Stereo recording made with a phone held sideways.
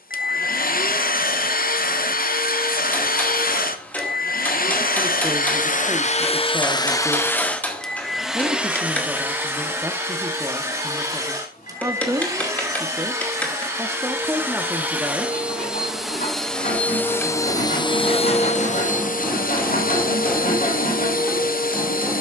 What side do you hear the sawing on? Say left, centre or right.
left.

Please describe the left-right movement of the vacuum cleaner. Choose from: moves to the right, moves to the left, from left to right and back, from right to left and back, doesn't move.
from left to right and back.